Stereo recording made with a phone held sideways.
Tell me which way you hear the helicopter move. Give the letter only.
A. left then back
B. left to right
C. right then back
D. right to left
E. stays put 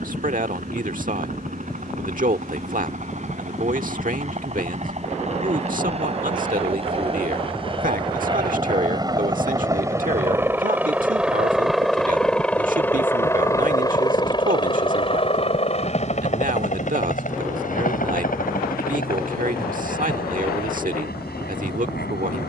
D.